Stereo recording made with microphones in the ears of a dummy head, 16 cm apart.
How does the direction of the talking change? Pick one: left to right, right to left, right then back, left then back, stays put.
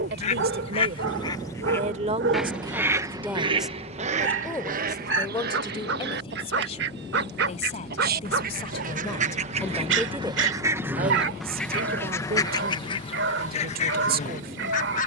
left then back.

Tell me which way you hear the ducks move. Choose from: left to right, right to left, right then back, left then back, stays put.
right then back.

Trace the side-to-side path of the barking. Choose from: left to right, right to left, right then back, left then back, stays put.
stays put.